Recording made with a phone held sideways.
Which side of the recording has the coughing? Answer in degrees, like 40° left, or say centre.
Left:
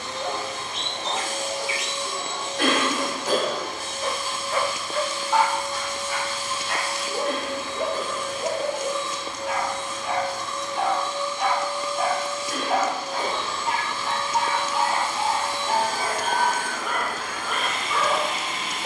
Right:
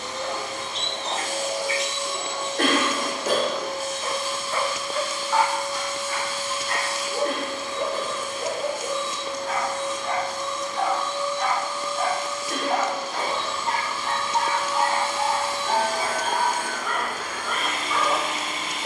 50° right.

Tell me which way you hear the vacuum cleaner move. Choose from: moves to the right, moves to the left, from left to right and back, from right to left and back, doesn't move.
doesn't move.